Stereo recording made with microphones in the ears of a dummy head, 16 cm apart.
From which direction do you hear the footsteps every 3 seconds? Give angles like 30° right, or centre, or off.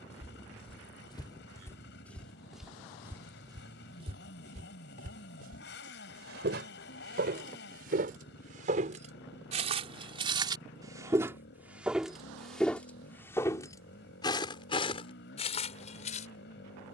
10° left, 40° right, 50° right, 20° right, 20° left, 40° left.